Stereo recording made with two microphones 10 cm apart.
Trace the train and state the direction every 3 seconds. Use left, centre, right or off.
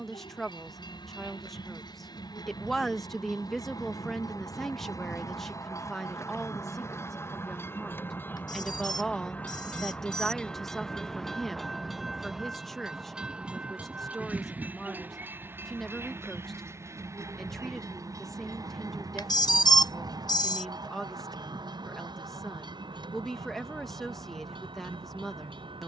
left, left, left, centre, centre, right, right, right, right.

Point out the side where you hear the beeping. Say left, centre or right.
left.